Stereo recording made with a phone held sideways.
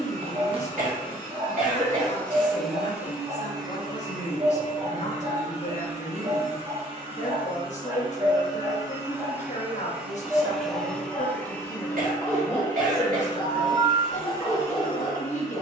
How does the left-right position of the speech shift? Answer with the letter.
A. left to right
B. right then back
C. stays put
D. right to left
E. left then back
C.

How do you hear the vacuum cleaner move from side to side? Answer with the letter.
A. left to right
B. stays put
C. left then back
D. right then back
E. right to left
D.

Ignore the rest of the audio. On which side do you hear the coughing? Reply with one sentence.
In this clip you hear the coughing on the right.